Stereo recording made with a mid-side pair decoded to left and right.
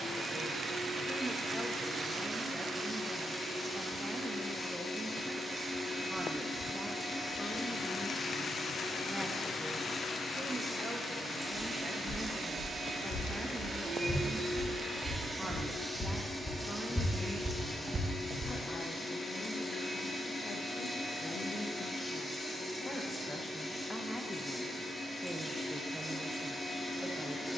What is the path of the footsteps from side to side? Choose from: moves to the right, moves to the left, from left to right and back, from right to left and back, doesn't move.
moves to the right.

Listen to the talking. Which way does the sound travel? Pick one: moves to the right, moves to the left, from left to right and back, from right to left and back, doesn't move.
from right to left and back.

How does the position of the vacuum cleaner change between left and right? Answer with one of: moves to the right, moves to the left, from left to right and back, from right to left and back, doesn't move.
from left to right and back.